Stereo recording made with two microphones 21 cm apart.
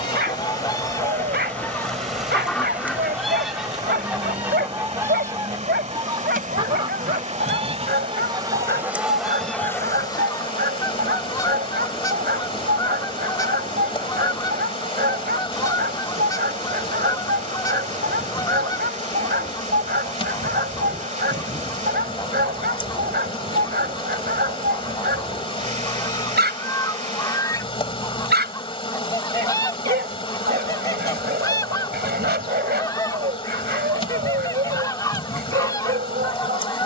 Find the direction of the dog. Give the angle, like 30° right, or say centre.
50° right.